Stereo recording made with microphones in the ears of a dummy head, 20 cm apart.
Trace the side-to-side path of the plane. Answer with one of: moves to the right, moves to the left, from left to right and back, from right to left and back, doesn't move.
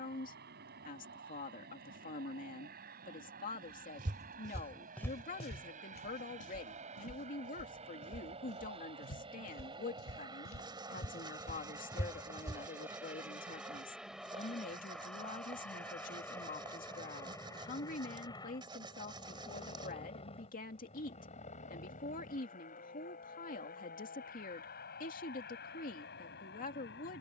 moves to the left.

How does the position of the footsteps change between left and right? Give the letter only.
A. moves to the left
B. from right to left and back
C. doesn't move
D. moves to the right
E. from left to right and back
B.